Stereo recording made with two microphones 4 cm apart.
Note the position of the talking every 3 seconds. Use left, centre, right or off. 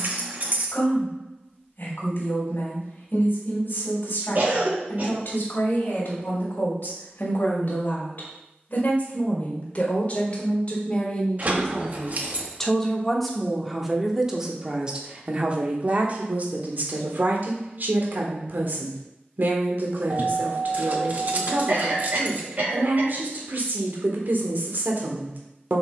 left, left, left, left, centre, right, right, right, right.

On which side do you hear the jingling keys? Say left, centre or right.
right.